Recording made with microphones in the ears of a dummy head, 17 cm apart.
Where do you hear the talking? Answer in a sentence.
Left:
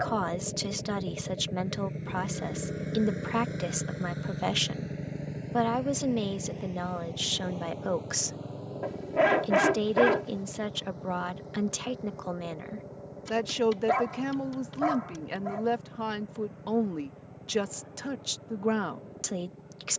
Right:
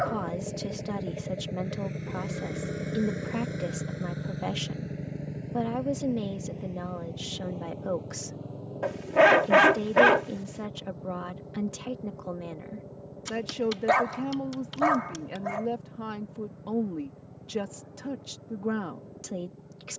In this clip you hear the talking on the left.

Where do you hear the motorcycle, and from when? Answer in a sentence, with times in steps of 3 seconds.
In this clip you hear the motorcycle on the right from 0 s, in the centre from 3 s and on the left from 6 s.